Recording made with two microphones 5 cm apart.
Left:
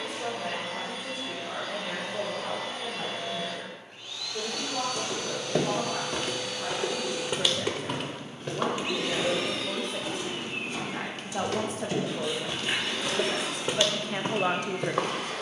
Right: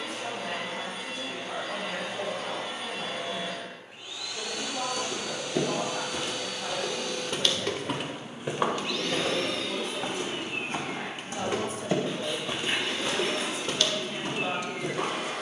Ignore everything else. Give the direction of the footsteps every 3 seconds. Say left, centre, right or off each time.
off, left, centre, right, centre.